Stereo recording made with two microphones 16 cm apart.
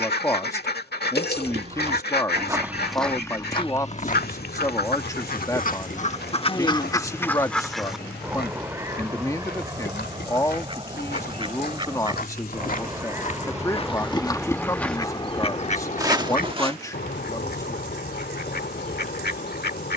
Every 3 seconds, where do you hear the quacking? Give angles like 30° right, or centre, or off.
70° left, 60° left, 10° left, 30° right, 10° right, 50° left, 70° left.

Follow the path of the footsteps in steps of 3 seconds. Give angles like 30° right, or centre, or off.
30° right, 50° left, 80° left, 70° left, 40° left, 20° right, off.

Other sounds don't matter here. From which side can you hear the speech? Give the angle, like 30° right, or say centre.
20° left.